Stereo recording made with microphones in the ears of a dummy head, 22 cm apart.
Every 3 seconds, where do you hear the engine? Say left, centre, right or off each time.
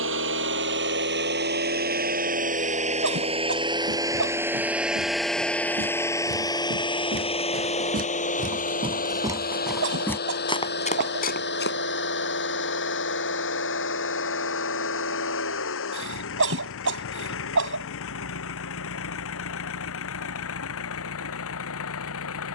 right, centre, left, left, left, left, left, left.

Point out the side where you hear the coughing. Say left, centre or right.
right.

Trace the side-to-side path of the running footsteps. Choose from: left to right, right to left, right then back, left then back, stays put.
right to left.